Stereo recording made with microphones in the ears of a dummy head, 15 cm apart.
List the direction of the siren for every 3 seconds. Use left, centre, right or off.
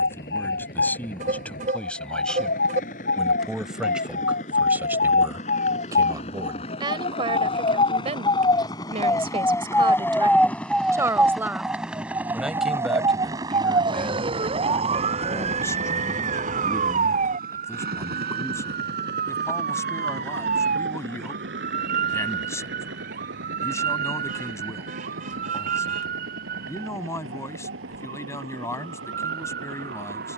left, left, left, centre, right, right, right, right, right, right.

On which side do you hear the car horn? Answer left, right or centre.
right.